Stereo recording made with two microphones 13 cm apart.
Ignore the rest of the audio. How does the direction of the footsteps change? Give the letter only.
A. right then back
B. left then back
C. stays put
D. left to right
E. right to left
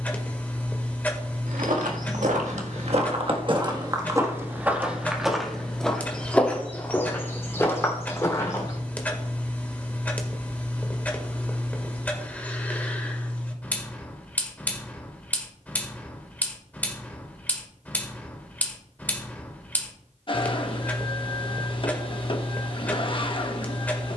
E.